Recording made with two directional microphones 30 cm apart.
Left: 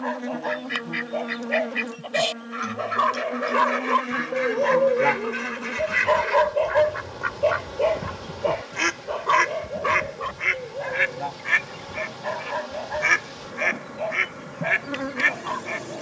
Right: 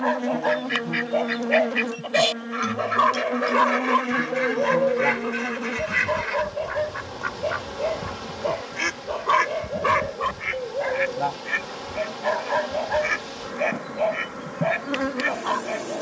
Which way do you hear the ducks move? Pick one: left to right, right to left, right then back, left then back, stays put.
right to left.